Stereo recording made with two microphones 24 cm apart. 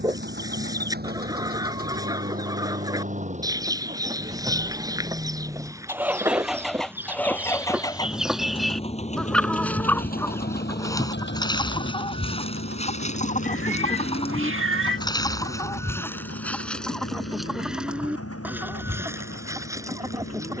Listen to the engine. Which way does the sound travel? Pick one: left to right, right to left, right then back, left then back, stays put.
right to left.